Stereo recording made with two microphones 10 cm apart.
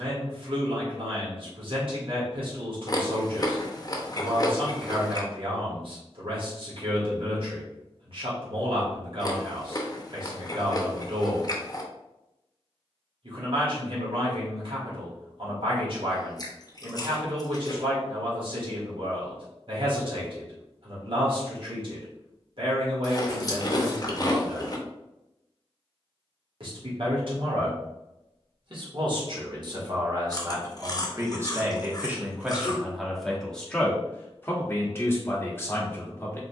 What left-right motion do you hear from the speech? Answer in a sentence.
In this clip you hear the speech move to the left.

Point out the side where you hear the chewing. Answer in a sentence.
In this clip you hear the chewing on the left.